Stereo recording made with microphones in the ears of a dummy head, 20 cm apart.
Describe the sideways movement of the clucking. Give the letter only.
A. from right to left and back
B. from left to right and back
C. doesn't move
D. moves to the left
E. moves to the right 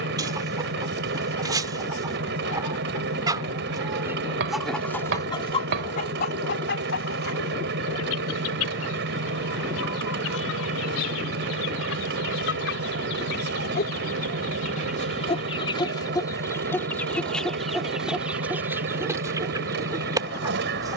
A.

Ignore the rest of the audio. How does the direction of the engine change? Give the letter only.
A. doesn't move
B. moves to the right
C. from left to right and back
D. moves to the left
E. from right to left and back
A.